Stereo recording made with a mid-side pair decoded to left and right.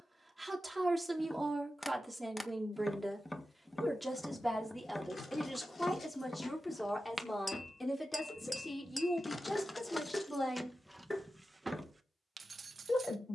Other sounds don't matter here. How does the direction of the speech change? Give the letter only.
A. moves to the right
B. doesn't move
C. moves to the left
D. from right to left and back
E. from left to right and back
C.